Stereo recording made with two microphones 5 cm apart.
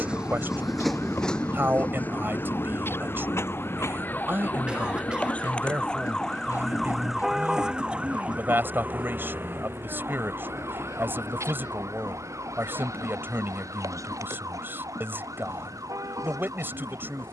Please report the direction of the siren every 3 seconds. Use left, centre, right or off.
left, left, centre, right, right, right.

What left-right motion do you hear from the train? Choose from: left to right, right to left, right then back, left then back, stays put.
right to left.